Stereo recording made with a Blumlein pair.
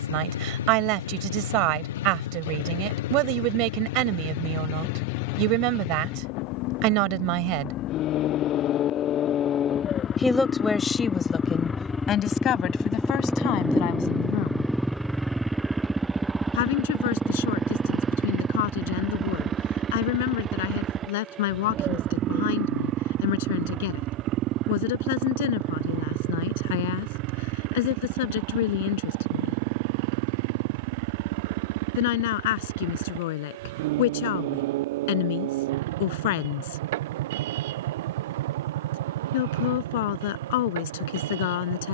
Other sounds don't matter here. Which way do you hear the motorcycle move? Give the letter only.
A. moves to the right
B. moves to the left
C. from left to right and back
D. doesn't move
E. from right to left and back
A.